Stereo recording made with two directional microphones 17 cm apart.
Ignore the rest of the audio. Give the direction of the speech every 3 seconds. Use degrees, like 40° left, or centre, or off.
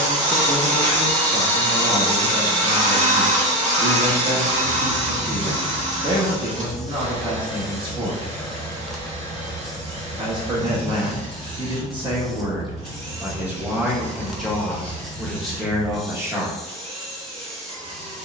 30° right, 30° right, 30° right, 30° right, 10° right, 10° right.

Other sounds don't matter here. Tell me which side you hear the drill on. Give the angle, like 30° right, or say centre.
40° right.